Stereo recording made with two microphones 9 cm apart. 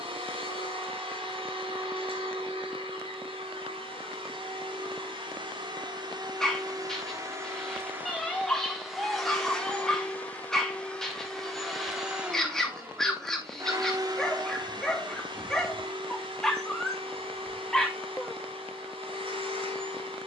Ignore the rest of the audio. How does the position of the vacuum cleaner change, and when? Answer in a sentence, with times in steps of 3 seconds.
In this clip you hear the vacuum cleaner on the right from 0 s, in the centre from 9 s and on the right from 12 s.